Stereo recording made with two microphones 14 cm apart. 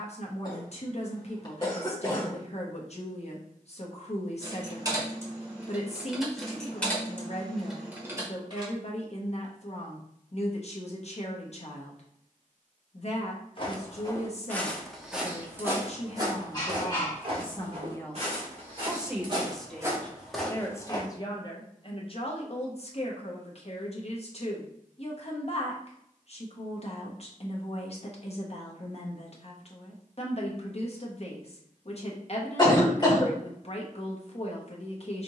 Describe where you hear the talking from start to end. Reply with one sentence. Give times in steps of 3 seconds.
You can hear the talking on the left from 0 s, in the centre from 18 s and on the left from 21 s.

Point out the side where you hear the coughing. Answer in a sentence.
In this clip you hear the coughing on the left.